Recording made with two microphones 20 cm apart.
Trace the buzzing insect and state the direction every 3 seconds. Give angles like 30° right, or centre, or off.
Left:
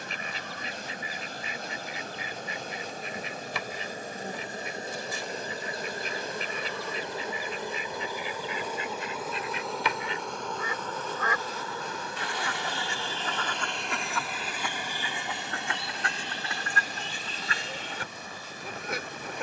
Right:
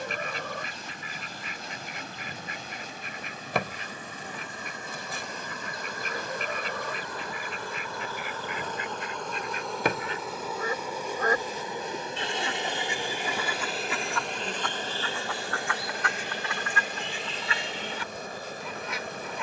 50° left, 40° left, 20° left, 10° right, 30° right, 50° right, 50° right.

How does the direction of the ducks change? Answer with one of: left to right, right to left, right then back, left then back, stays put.
right to left.